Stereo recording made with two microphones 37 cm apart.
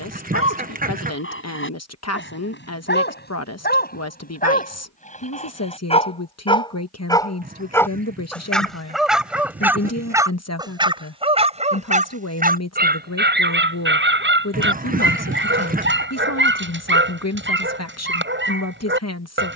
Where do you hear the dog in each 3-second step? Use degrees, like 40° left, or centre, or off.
30° left, 20° left, 10° left, 10° right, 30° right, 30° right, 30° right.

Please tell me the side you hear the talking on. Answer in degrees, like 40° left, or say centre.
40° left.